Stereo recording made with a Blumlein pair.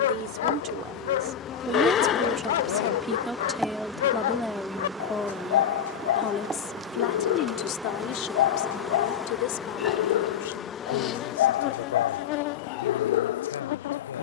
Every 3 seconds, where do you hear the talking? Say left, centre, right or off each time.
right, centre, left, left, left.